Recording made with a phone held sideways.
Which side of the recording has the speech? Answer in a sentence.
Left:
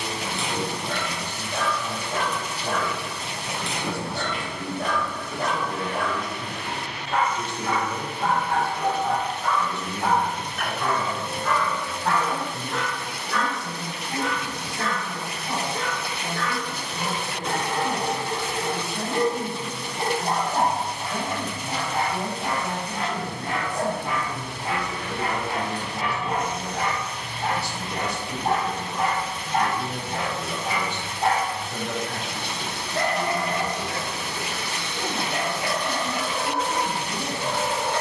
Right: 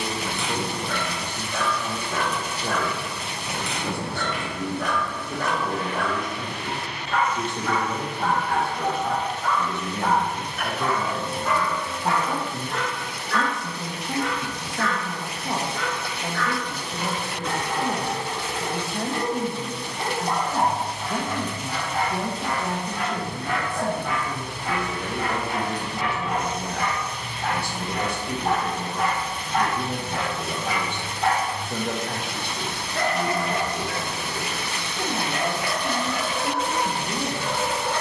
You can hear the speech on the right.